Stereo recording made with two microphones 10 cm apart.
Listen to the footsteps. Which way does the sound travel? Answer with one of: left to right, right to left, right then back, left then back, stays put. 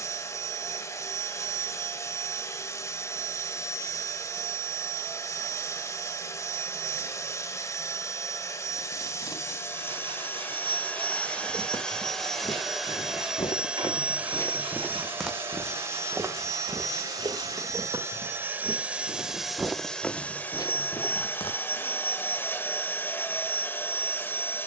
right then back.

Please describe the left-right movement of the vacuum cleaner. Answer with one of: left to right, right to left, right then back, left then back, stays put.
right then back.